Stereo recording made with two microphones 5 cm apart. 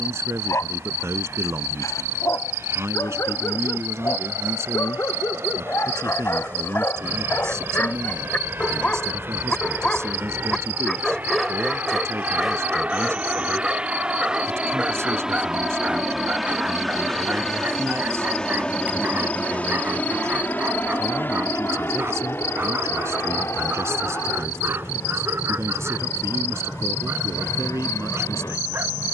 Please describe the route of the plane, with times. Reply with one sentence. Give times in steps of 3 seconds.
In this clip you hear the plane on the right from 0 s, in the centre from 15 s and on the left from 18 s.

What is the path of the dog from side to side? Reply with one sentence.
You can hear the dog travel towards the right.